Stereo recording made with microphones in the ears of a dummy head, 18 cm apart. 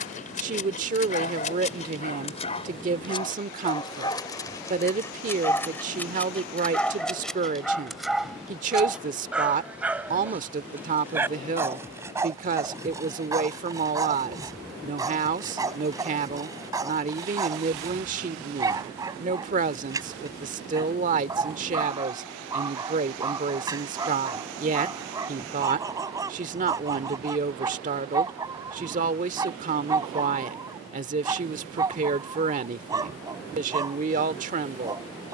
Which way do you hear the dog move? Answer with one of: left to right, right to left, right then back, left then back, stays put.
left to right.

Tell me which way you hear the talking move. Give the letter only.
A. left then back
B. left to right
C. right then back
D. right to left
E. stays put
E.